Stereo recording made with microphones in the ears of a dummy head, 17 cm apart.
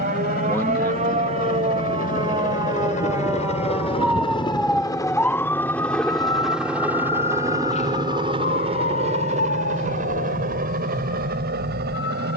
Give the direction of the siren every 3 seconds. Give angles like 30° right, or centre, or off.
30° right, centre, 30° left, 50° left.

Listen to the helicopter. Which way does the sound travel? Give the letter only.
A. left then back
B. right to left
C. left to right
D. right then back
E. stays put
C.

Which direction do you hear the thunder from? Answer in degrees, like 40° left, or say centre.
20° left.